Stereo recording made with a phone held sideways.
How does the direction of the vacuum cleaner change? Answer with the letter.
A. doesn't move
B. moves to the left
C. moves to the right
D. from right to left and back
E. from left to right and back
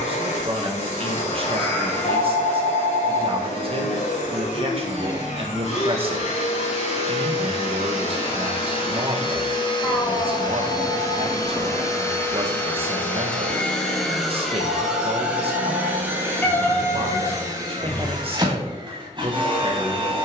C.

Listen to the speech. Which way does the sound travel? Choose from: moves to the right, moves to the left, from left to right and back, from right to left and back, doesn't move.
doesn't move.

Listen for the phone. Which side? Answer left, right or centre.
left.